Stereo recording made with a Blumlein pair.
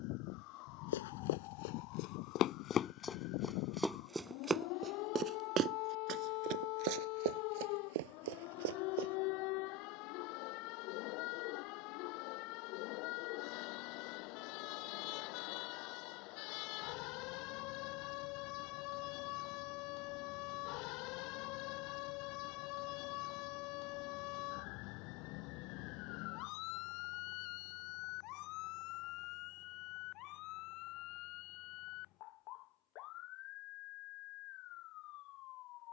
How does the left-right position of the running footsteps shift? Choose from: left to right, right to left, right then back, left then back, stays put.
left to right.